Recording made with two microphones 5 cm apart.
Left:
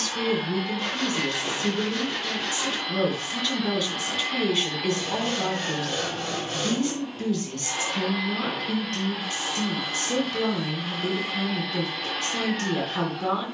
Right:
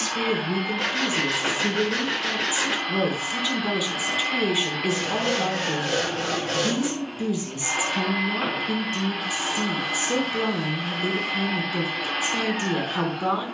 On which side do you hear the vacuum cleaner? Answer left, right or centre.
right.